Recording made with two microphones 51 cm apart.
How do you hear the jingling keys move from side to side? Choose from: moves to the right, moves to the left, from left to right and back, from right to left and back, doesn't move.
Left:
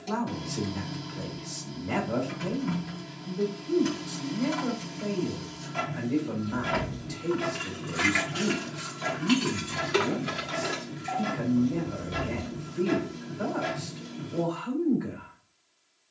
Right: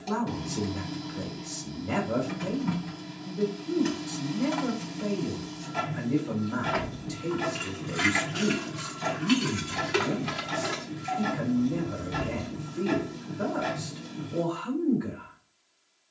moves to the right.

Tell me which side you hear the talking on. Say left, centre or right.
right.